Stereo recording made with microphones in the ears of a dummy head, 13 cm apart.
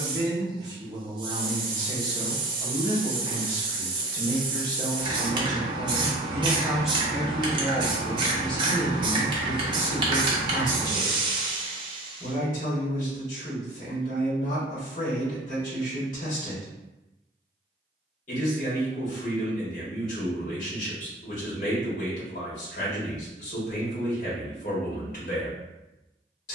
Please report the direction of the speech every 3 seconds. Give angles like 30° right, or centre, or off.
30° right, 30° right, 10° left, 50° left, 60° left, 60° left, 60° left, 60° left, 60° left.